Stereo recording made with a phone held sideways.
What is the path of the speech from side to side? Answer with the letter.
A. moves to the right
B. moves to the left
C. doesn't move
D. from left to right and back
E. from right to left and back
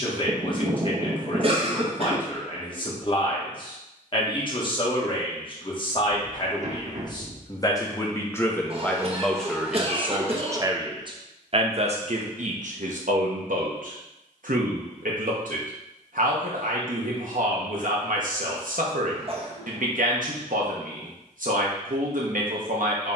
A.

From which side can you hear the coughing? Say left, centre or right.
right.